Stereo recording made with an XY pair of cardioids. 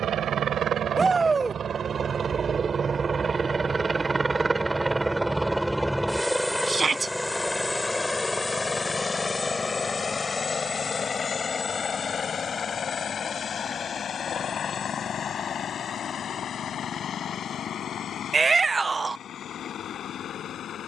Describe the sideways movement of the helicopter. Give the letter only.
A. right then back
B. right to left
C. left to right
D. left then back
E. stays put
B.